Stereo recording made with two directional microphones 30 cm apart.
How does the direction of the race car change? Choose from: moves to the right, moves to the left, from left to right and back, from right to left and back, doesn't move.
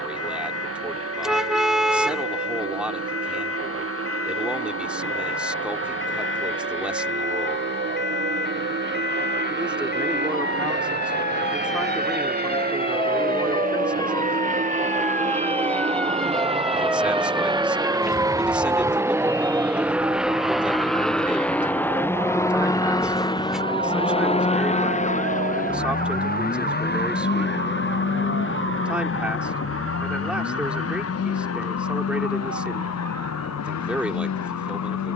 moves to the left.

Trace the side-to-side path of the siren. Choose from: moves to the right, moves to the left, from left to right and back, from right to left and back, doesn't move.
moves to the right.